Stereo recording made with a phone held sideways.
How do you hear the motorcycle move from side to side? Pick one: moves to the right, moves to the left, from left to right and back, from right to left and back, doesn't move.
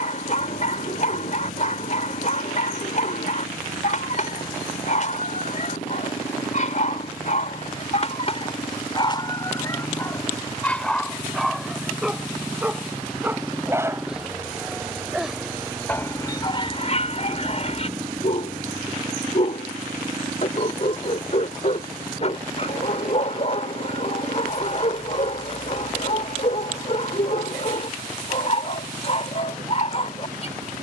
moves to the right.